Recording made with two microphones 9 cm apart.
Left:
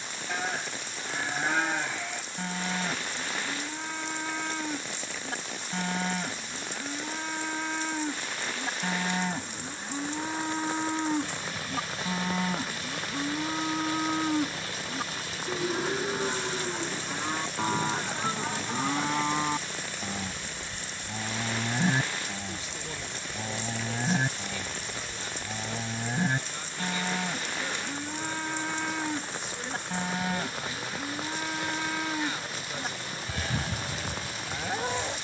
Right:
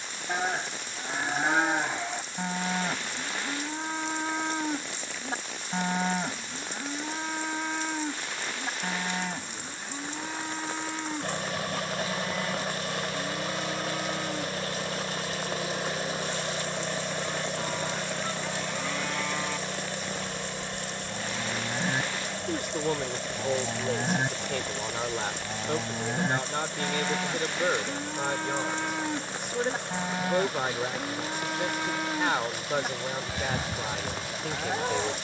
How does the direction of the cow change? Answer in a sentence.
In this clip you hear the cow move from right to left and back again.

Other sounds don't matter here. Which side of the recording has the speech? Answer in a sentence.
In this clip you hear the speech on the right.